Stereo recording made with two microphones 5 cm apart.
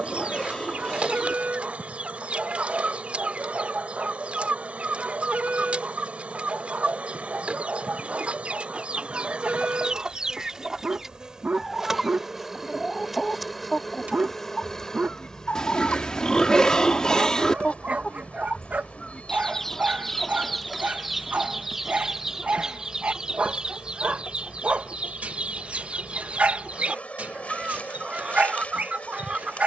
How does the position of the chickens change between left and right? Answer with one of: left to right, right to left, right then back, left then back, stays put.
left then back.